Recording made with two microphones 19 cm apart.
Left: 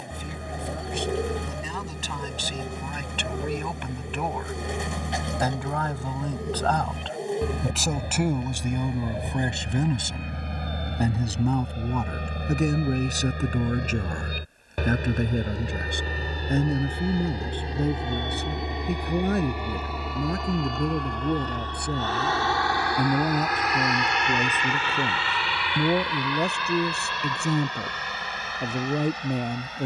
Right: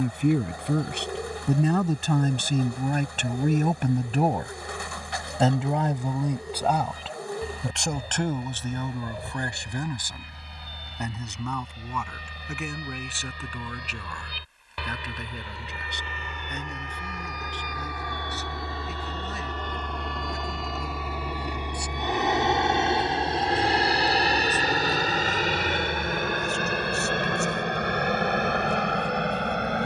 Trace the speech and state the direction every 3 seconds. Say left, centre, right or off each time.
right, right, centre, left, left, left, left, left, left, left.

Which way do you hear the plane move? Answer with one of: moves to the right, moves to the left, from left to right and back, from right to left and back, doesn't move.
moves to the right.